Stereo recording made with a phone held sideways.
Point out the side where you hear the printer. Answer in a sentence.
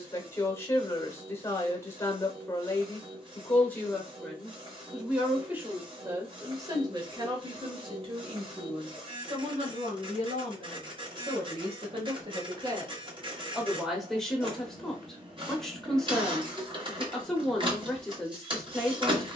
You can hear the printer on the right.